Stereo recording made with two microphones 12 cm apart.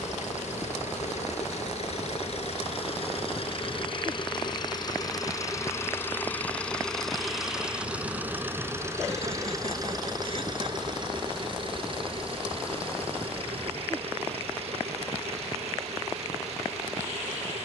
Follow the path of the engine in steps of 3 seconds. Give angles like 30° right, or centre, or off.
60° left, 40° left, centre, 40° right, 50° right, 60° right.